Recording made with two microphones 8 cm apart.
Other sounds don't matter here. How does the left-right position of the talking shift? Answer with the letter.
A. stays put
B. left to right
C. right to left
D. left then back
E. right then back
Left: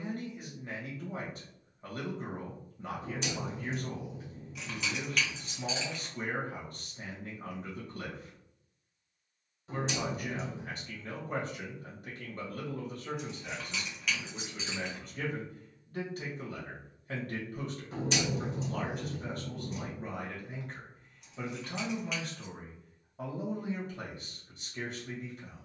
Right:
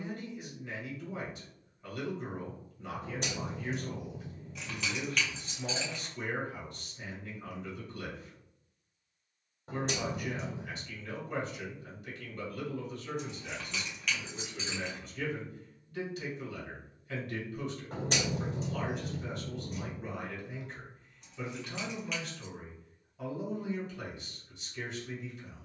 A.